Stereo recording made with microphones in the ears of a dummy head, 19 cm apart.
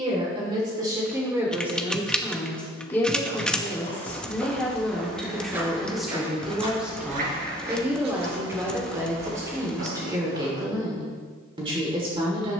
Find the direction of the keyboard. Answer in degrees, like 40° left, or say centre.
centre.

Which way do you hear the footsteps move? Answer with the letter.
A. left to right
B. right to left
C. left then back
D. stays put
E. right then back
A.